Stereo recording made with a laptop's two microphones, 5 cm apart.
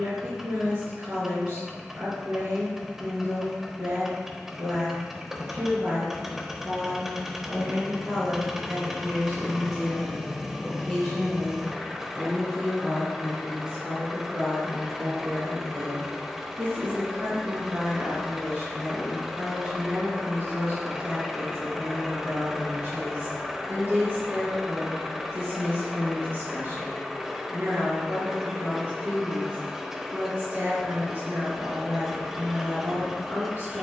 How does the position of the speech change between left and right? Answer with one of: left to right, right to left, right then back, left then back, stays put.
left then back.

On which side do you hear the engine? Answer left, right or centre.
centre.